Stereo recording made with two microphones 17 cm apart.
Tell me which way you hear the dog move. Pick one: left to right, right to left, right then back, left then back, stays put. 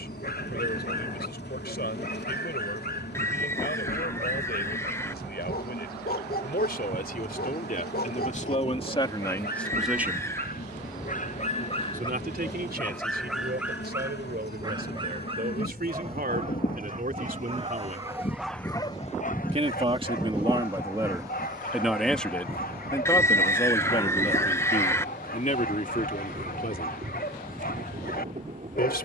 right then back.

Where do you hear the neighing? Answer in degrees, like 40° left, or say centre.
10° left.